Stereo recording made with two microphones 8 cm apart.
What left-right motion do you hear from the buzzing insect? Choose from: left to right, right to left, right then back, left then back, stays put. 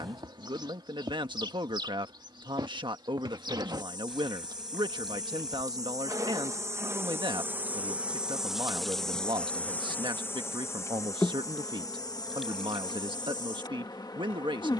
right to left.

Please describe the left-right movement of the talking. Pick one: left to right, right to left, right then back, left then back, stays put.
stays put.